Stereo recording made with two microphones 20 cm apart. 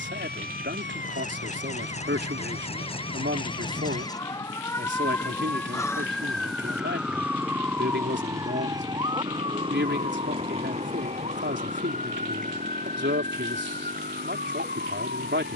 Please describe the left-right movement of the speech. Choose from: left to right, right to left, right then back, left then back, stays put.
stays put.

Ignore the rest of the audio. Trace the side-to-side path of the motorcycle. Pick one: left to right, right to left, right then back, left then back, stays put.
left to right.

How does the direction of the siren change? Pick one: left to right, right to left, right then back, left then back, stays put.
left to right.